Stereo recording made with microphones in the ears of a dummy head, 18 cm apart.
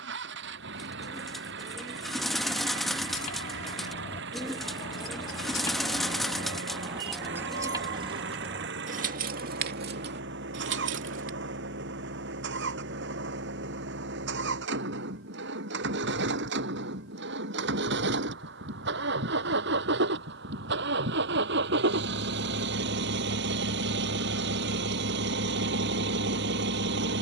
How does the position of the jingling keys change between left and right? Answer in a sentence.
You can hear the jingling keys move from left to right.